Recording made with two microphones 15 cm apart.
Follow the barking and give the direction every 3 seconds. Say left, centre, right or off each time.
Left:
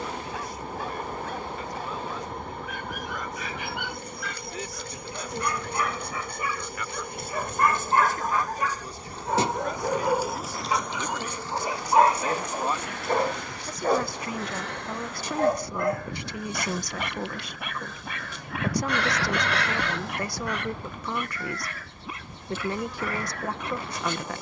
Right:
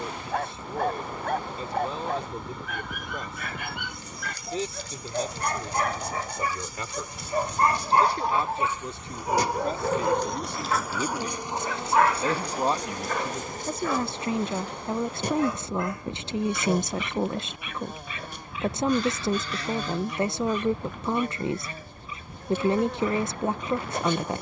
right, right, right, centre, left, left, left, left.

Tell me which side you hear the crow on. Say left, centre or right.
left.